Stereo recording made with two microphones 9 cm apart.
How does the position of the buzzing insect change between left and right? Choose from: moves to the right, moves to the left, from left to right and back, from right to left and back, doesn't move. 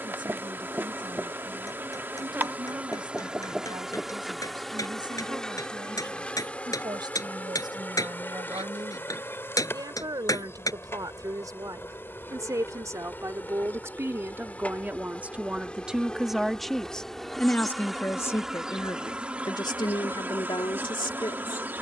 from right to left and back.